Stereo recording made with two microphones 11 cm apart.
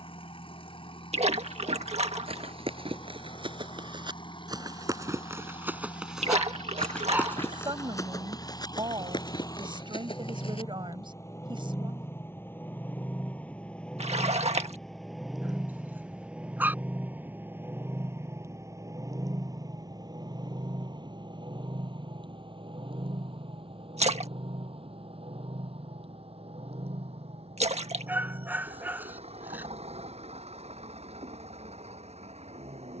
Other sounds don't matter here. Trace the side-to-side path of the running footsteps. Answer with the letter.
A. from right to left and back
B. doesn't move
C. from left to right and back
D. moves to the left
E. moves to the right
D.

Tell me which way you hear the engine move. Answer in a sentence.
In this clip you hear the engine travel towards the right.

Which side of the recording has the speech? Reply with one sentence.
You can hear the speech on the right.